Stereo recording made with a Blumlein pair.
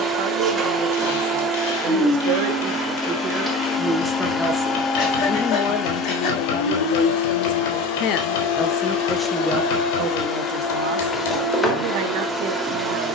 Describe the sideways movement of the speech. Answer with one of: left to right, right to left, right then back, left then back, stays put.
left then back.